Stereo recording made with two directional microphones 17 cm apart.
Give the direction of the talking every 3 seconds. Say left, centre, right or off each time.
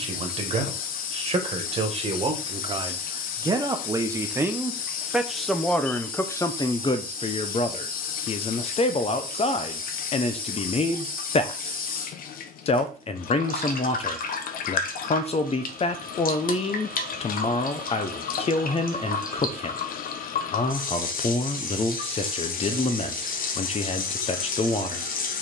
right, centre, left, left, left, left, left, left, left.